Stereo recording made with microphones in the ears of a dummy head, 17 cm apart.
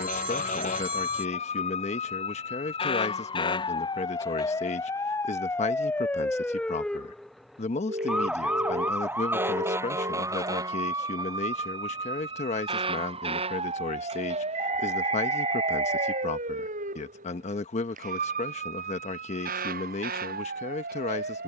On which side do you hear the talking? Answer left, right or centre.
left.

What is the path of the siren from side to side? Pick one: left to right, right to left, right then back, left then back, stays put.
left to right.